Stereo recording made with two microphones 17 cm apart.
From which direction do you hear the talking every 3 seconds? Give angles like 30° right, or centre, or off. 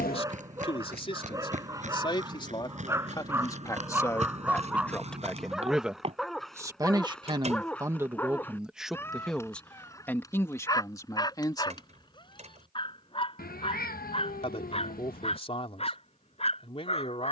30° left, 10° left, 20° right, 10° left, 40° left, 40° left.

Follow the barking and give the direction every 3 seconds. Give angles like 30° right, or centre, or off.
20° right, 10° right, 10° left, 20° left, 30° left, 40° left.